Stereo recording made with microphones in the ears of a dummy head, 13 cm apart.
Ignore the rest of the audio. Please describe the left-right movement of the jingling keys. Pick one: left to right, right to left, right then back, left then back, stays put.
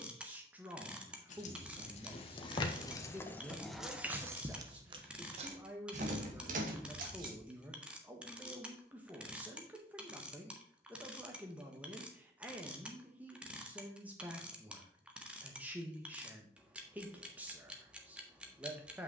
left to right.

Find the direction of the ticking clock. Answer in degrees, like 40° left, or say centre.
10° right.